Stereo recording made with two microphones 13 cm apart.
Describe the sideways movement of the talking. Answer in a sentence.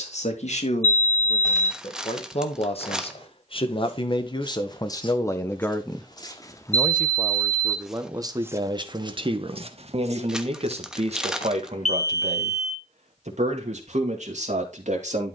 In this clip you hear the talking go from the left side to the right.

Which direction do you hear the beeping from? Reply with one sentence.
You can hear the beeping on the left.